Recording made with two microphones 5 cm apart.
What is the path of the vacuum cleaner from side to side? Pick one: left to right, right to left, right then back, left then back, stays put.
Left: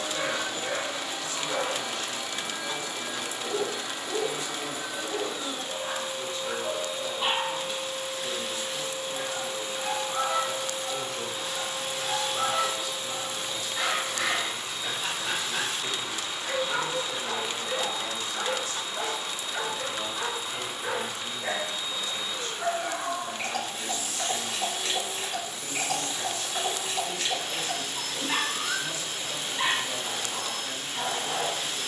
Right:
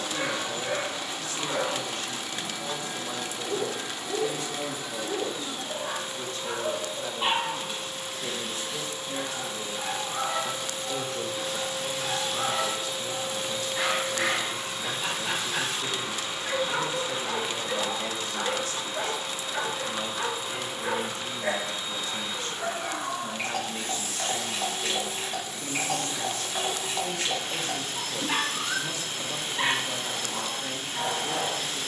left to right.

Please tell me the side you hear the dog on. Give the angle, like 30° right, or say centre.
10° right.